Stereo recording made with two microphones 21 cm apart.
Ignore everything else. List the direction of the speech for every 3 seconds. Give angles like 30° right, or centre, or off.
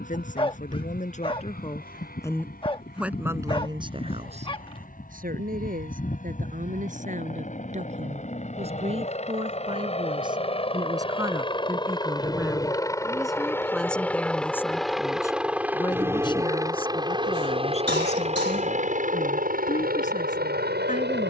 30° left, 30° right, 40° right, 20° right, centre, 30° left, 40° left.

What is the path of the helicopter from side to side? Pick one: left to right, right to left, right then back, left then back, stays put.
left to right.